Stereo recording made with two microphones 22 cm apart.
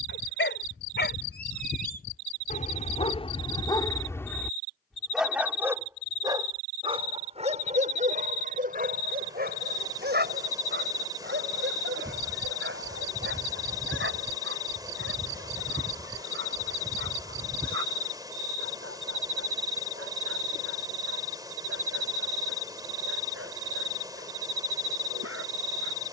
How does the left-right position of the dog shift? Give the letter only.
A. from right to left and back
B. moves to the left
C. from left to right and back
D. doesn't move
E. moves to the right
E.